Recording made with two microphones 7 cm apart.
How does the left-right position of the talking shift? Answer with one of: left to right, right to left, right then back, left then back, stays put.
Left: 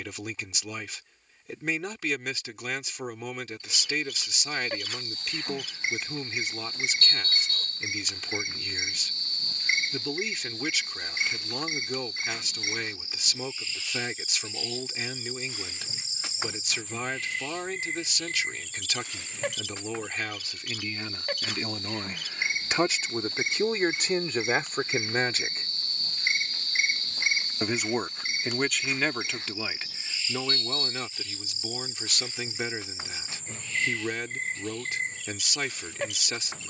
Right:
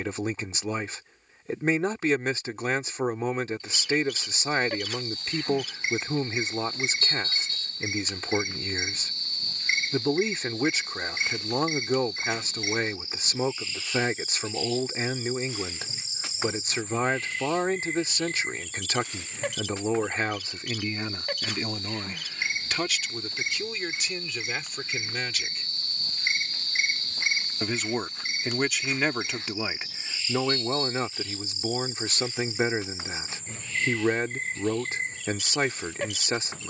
left then back.